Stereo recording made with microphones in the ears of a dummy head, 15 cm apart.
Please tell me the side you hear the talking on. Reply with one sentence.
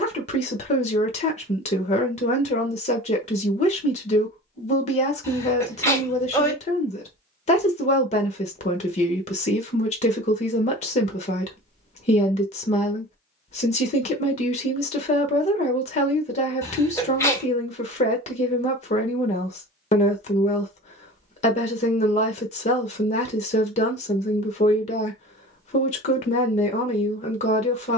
In this clip you hear the talking on the left.